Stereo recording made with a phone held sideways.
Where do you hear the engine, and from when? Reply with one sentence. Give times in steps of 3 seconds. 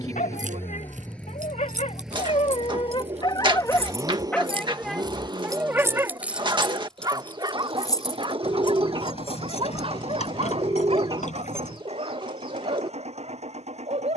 In this clip you hear the engine in the centre from 0 s and on the right from 3 s.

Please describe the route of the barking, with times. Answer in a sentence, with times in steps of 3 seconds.
In this clip you hear the barking on the left from 0 s, in the centre from 3 s and on the right from 6 s.